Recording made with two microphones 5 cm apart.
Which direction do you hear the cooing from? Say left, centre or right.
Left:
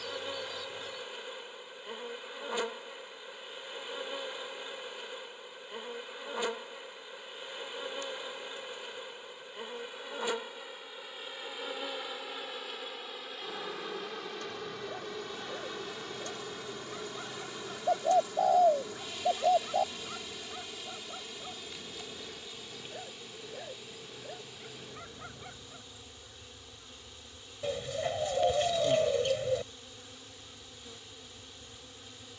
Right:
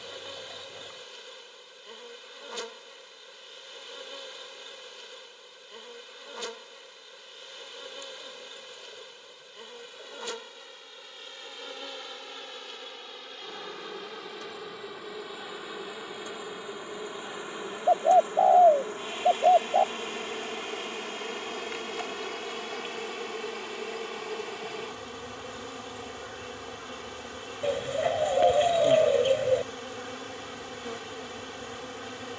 right.